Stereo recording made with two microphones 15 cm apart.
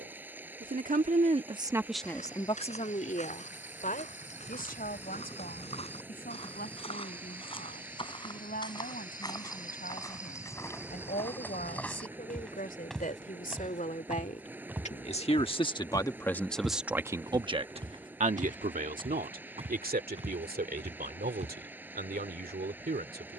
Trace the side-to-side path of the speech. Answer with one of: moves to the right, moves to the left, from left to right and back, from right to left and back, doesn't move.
from right to left and back.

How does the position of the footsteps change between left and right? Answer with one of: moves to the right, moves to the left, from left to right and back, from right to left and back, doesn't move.
moves to the right.